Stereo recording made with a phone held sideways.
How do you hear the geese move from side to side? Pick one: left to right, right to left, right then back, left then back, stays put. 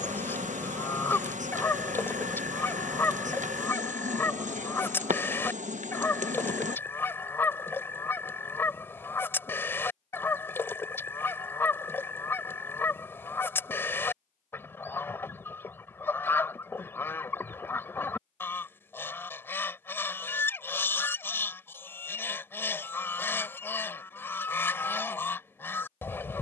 stays put.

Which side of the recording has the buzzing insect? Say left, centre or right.
right.